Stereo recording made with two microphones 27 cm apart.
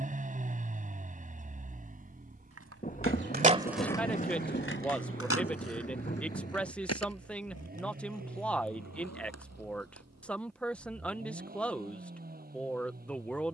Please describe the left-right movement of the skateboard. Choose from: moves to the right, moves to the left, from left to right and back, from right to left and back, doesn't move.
moves to the left.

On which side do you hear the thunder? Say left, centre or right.
left.